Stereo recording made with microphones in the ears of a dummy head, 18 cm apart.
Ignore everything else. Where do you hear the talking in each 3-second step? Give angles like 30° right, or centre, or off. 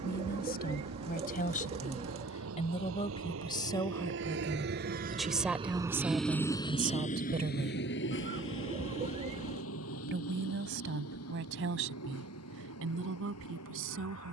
40° left, 10° left, 20° right, 60° right, 70° right.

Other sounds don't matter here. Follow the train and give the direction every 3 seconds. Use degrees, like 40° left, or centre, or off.
80° right, 50° right, 40° left, 70° left, 80° left.